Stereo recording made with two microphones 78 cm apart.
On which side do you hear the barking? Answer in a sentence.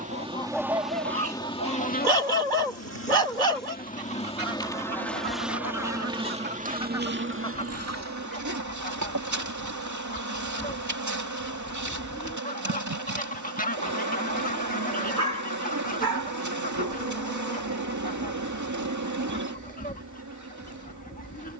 You can hear the barking on the right.